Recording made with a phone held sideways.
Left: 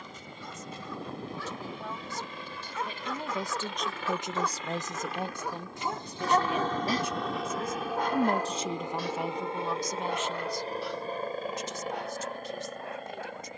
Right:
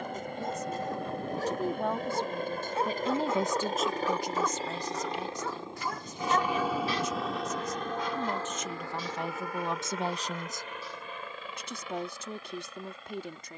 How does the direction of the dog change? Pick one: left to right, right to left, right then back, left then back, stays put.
right to left.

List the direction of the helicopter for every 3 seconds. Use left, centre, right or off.
right, right, centre, left, left.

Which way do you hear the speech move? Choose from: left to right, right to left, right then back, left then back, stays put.
left then back.